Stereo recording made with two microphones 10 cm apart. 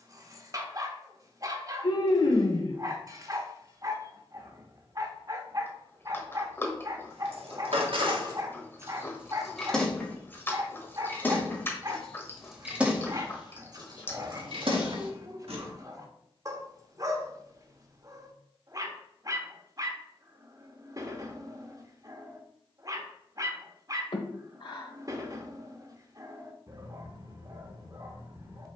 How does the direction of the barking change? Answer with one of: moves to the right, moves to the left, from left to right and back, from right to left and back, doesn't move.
doesn't move.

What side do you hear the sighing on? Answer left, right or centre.
left.